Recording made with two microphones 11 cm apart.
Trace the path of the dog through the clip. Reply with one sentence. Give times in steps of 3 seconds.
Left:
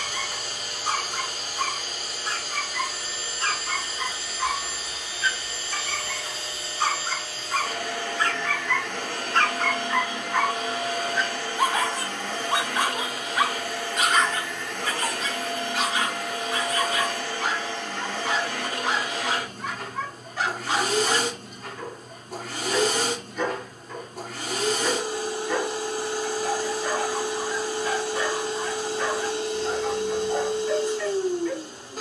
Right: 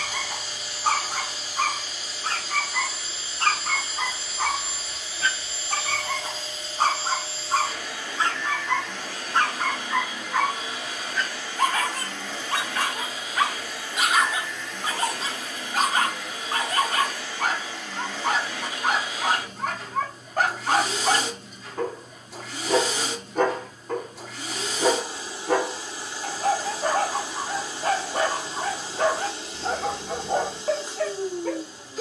You can hear the dog on the right from 0 s, in the centre from 9 s and on the right from 15 s.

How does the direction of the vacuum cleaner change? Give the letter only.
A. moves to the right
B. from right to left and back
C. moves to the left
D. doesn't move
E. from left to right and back
D.